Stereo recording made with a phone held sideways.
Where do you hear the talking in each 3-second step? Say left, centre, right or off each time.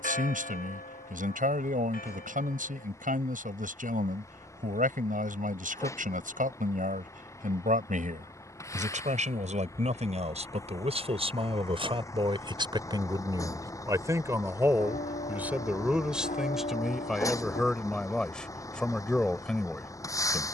right, right, right, right, right, centre, centre.